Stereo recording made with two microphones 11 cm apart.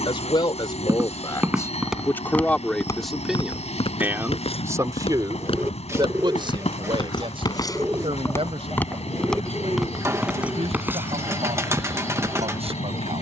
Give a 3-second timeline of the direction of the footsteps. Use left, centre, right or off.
centre, left, left, centre, right.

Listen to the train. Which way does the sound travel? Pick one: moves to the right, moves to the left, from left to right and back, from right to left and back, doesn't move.
doesn't move.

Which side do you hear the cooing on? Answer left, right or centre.
right.